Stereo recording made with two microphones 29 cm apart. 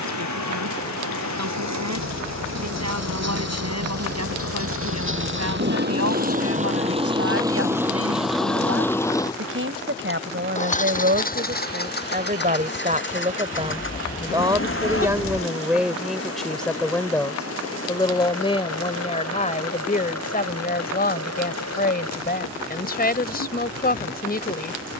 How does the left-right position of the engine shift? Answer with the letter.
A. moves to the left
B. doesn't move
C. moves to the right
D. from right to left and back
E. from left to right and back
A.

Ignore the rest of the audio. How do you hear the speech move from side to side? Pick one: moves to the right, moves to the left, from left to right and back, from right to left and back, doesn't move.
moves to the left.